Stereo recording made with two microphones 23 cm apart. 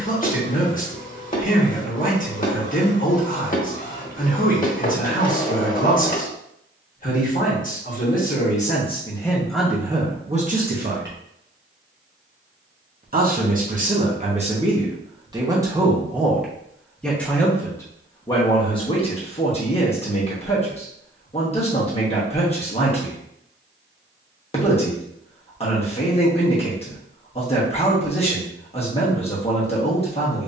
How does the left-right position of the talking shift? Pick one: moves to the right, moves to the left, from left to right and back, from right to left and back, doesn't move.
from left to right and back.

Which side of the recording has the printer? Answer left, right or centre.
left.